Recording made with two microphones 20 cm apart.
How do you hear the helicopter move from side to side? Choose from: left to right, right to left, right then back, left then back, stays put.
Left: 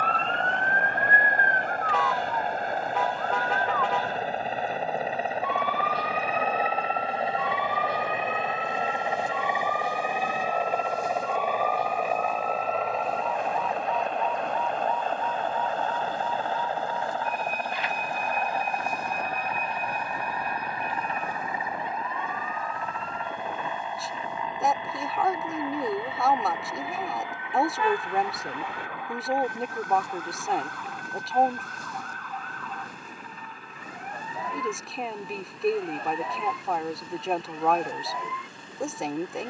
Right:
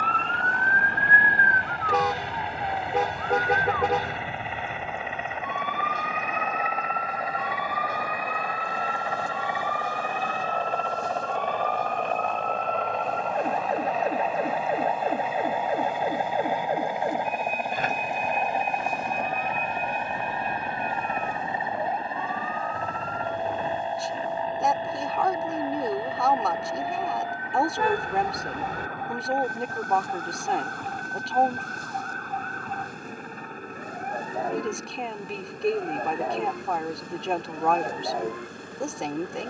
left to right.